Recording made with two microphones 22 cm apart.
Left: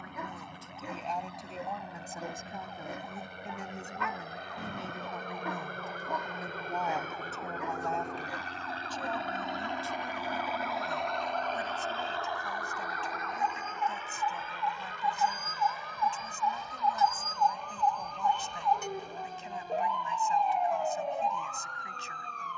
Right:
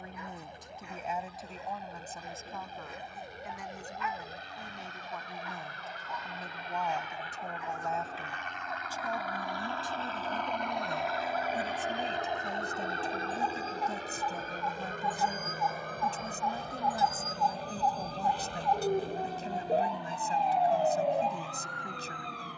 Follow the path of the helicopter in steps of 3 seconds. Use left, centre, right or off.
left, left, left, centre, right, right, right, right.